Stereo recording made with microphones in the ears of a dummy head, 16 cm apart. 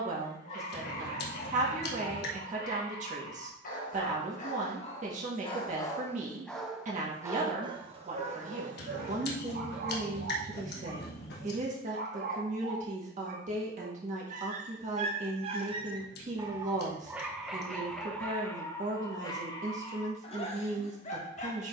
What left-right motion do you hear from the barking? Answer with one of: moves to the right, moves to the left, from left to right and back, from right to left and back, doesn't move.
from left to right and back.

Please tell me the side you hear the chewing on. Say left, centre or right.
left.